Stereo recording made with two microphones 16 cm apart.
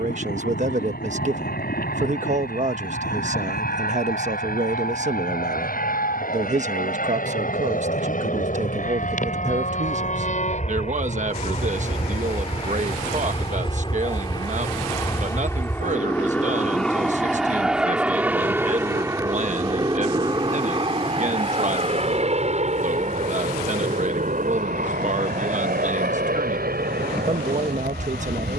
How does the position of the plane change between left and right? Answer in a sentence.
In this clip you hear the plane go from the left side to the right.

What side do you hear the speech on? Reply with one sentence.
In this clip you hear the speech on the right.